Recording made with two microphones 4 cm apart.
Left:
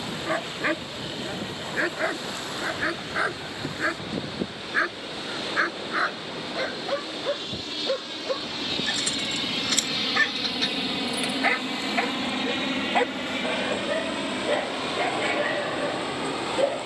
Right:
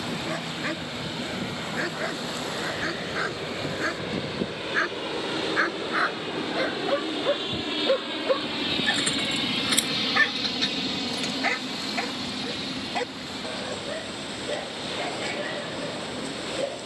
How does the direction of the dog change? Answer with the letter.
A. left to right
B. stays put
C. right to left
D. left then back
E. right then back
E.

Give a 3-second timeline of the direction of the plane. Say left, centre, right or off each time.
right, right, right, centre, left, left.